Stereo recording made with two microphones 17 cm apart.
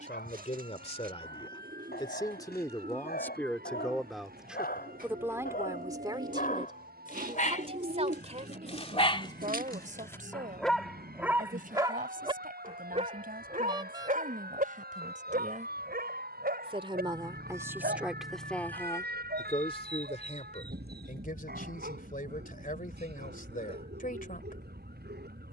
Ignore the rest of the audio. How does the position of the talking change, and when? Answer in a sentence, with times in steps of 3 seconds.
In this clip you hear the talking on the left from 0 s, in the centre from 3 s, on the right from 6 s and on the left from 18 s.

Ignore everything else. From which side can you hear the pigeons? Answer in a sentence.
You can hear the pigeons on the right.